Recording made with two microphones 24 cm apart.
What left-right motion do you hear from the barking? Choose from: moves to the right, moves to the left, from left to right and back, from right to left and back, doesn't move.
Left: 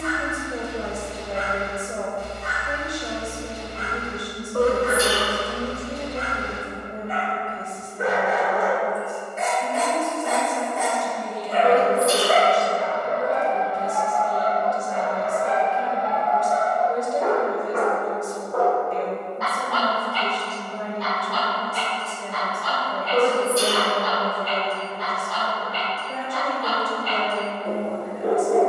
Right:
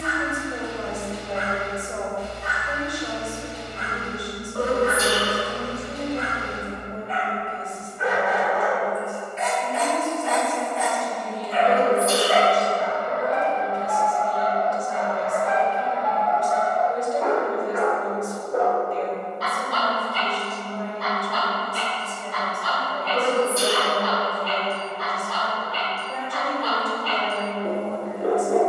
moves to the right.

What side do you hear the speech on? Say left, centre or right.
left.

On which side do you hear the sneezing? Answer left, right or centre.
left.